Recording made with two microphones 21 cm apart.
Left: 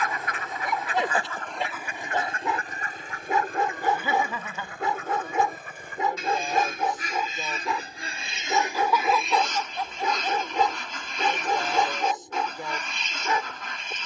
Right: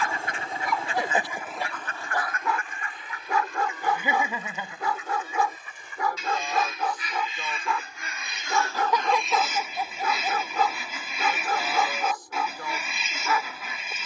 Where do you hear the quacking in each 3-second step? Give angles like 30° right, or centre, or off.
centre, 60° left, 40° left, 10° right, 10° right.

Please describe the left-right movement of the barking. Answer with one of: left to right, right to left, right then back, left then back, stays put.
stays put.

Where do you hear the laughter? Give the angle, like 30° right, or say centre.
20° right.